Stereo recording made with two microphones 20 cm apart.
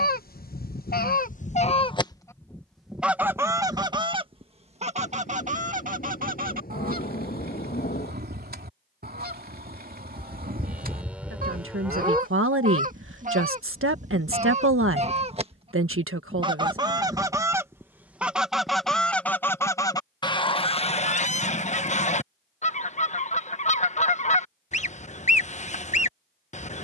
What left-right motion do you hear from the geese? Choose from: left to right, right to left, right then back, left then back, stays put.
right then back.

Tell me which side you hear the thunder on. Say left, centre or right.
left.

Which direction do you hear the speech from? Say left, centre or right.
right.